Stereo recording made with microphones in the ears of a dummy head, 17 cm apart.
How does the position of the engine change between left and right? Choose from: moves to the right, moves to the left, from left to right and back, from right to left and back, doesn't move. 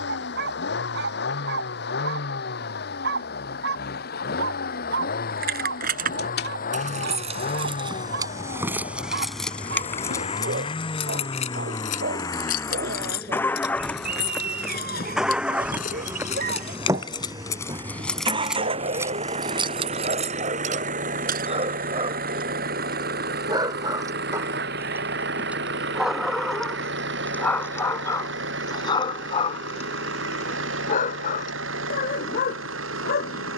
moves to the right.